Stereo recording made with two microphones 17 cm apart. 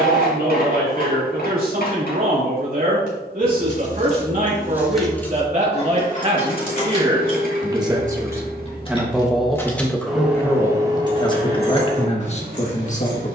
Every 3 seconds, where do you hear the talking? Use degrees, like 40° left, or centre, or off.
60° right, 50° right, 30° right, 10° left, 40° left.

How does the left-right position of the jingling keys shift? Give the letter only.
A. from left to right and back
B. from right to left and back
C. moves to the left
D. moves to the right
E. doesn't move
B.